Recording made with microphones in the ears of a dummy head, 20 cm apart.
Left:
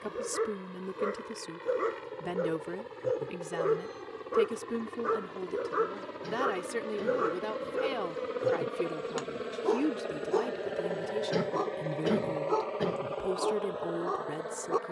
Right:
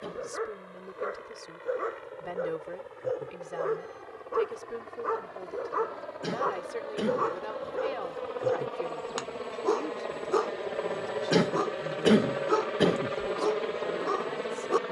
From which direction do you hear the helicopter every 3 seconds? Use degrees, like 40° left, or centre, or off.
50° left, 50° left, 30° left, 10° left, 30° right.